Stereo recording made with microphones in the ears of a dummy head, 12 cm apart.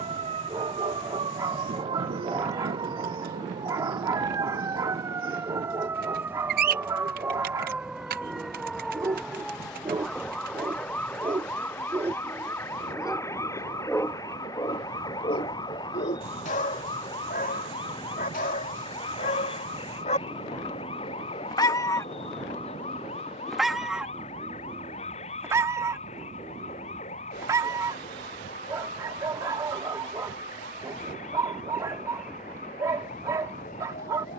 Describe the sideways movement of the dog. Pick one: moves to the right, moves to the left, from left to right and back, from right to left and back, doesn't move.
from right to left and back.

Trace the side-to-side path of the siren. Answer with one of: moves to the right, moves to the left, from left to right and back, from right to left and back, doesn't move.
moves to the left.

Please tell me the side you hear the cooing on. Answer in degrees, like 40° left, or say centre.
70° right.